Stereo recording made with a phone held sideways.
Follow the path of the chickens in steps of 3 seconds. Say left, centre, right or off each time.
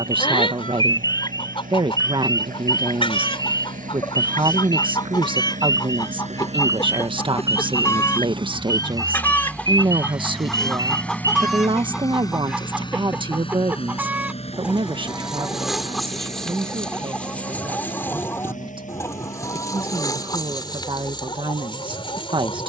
left, left, left, centre, centre, centre, left, left.